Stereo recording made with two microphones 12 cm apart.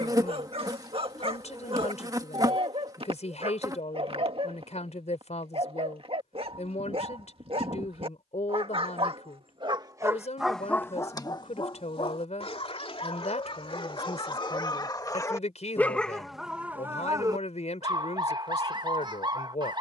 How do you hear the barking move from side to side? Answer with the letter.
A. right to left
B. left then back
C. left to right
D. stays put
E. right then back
B.